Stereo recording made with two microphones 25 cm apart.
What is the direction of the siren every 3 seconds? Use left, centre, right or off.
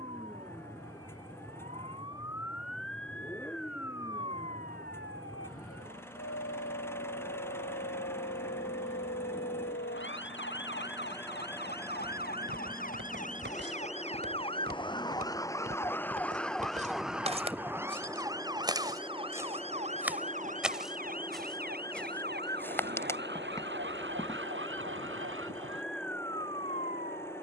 left, left, left, left, left, centre, right, right, right.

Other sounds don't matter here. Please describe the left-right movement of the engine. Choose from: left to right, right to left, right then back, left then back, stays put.
stays put.